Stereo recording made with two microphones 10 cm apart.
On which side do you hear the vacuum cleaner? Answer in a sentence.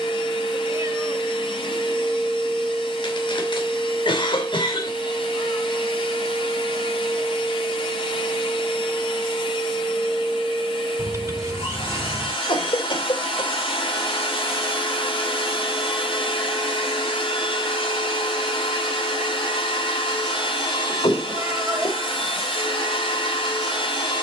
You can hear the vacuum cleaner on the left.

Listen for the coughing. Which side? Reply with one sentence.
In this clip you hear the coughing on the left.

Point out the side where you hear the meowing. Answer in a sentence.
In this clip you hear the meowing on the right.